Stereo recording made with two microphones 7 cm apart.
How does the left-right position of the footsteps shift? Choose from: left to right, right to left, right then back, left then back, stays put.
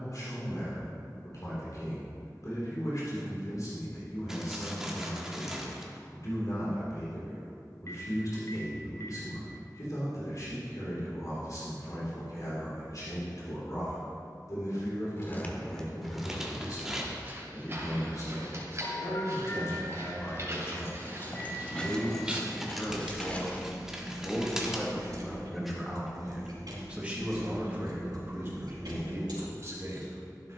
right then back.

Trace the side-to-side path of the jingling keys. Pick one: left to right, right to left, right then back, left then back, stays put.
left to right.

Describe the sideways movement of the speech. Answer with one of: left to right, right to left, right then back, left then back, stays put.
left to right.